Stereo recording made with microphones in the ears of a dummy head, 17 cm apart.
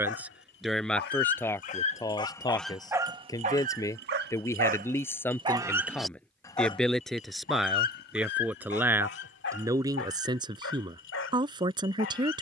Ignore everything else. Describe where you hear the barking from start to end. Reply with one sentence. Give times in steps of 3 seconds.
In this clip you hear the barking on the left from 0 s, on the right from 3 s and on the left from 6 s.